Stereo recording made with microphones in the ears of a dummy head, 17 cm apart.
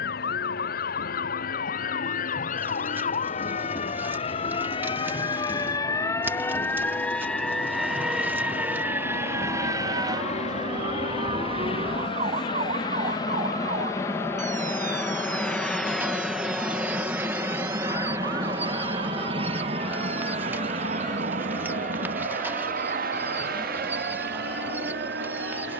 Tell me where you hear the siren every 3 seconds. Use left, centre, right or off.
left, left, centre, right, right, right, right, right, right.